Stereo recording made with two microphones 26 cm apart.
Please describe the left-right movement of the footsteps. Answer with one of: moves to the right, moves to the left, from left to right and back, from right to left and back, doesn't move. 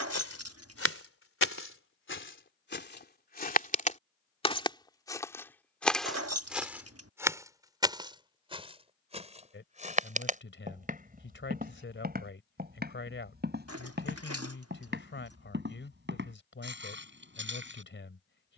moves to the right.